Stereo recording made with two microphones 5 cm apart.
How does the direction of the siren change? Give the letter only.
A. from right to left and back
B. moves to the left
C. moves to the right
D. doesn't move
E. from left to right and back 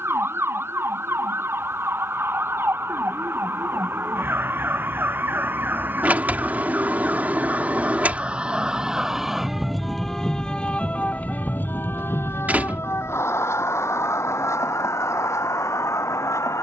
B.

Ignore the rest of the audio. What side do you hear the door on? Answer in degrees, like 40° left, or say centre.
30° right.